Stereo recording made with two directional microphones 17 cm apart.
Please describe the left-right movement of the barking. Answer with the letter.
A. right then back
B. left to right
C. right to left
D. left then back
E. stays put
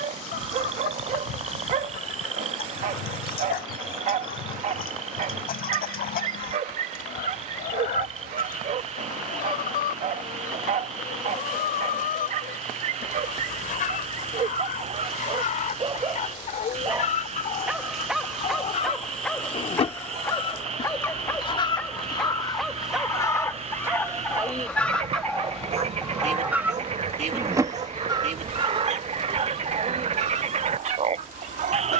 D.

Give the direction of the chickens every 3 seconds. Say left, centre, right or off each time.
left, left, left, left, left, left, left, left, centre, right, right.